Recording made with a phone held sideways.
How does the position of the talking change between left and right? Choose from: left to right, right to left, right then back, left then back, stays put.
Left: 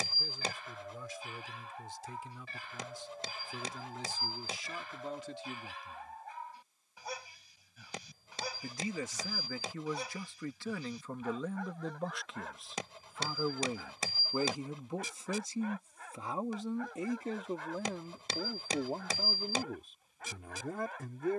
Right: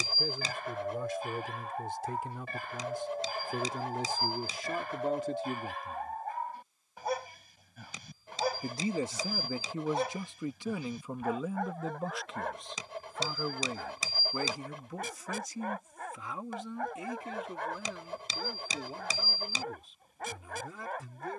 right to left.